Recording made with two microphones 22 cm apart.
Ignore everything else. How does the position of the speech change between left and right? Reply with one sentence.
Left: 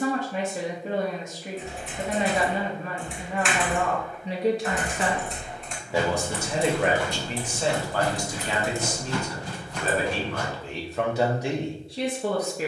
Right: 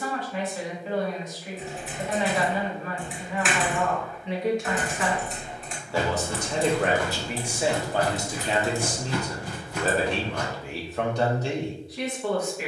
In this clip you hear the speech move from left to right and back again.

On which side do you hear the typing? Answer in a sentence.
In this clip you hear the typing in the centre.